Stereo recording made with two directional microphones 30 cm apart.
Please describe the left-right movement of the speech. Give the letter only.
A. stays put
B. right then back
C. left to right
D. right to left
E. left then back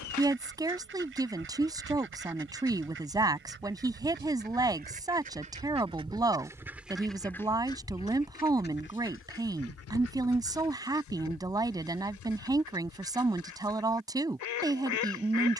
A.